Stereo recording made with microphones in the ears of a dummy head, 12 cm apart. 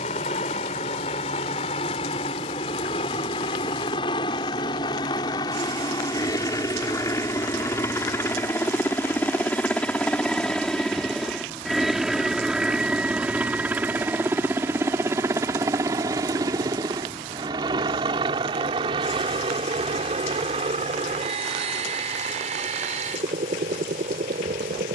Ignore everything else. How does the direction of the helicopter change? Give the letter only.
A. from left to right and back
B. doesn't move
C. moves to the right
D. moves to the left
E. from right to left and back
C.